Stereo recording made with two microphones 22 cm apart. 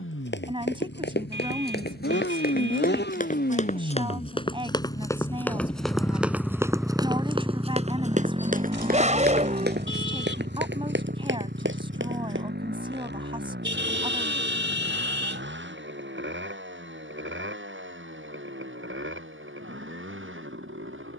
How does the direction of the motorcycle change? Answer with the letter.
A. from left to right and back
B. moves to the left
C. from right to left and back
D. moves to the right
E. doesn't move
D.